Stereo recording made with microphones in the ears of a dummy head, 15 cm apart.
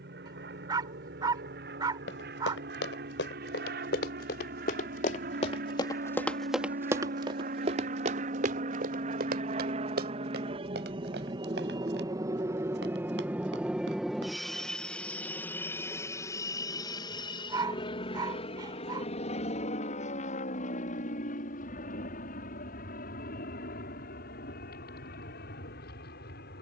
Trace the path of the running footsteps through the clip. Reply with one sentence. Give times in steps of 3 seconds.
In this clip you hear the running footsteps on the left from 0 s, on the right from 6 s and not at all from 15 s.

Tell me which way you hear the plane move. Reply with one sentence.
In this clip you hear the plane move from right to left.